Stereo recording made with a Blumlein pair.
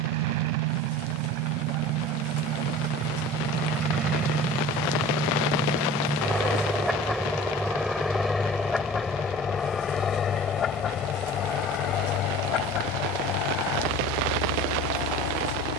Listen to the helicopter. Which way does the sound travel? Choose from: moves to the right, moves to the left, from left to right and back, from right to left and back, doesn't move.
moves to the left.